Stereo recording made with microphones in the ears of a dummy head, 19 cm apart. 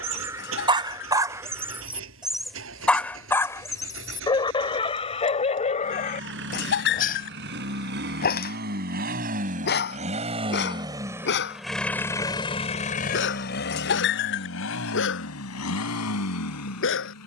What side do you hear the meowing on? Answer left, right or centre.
left.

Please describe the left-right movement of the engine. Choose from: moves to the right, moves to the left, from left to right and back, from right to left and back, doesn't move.
moves to the left.